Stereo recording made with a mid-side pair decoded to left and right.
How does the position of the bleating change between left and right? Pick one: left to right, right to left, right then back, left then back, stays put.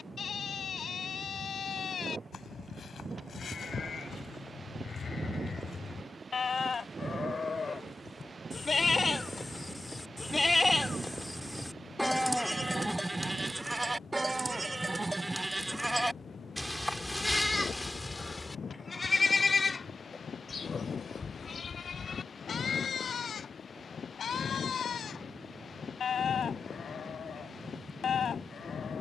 right then back.